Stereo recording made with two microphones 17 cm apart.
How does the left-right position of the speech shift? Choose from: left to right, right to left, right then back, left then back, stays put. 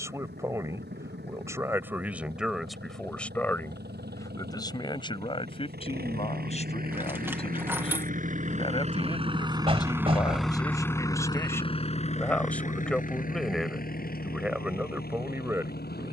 left then back.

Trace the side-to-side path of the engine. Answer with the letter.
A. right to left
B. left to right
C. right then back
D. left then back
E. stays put
A.